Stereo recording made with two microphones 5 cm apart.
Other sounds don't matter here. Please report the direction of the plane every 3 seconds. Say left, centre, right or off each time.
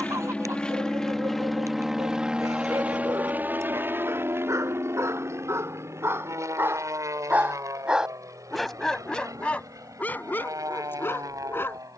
centre, right, right, right.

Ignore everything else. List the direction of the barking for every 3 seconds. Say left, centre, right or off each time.
right, right, right, left.